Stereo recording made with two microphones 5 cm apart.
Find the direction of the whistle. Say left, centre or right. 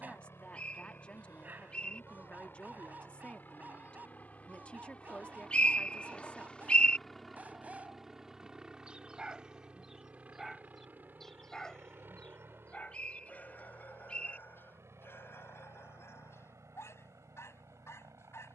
left.